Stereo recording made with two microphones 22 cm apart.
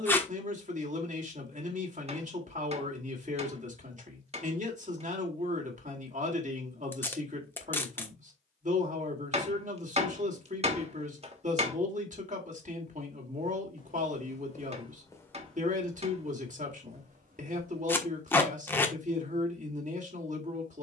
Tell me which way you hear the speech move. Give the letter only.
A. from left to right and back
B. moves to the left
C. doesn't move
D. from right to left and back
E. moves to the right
C.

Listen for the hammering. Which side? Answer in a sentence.
In this clip you hear the hammering on the right.